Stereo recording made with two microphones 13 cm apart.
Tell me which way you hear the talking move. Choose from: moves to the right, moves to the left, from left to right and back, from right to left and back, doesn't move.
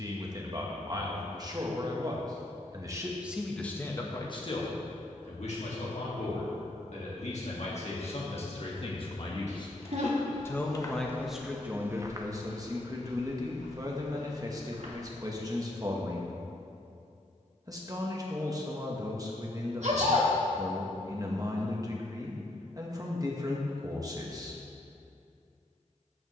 from right to left and back.